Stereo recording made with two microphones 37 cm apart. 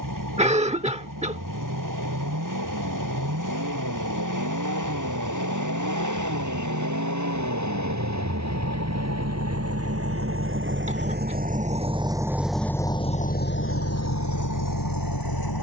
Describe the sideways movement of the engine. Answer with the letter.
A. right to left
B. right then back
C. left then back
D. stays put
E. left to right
A.